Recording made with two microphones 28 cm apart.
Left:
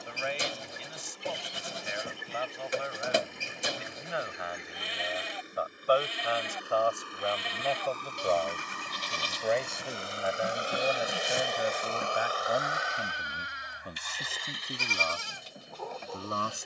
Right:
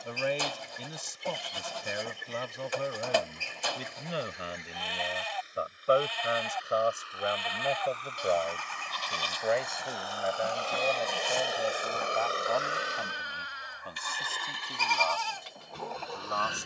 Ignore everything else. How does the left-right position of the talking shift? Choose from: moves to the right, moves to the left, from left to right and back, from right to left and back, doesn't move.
moves to the left.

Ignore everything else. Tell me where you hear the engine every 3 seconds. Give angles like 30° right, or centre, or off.
70° left, 60° left, 50° left, 20° left, 50° right, 80° right.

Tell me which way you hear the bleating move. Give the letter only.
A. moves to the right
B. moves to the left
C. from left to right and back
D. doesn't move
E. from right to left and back
D.